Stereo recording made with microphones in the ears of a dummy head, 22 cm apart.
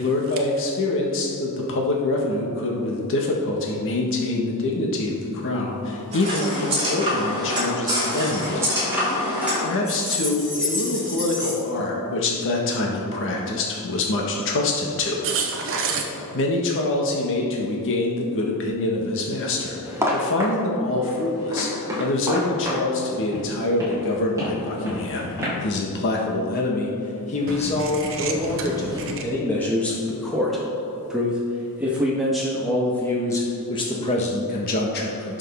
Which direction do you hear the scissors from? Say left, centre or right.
right.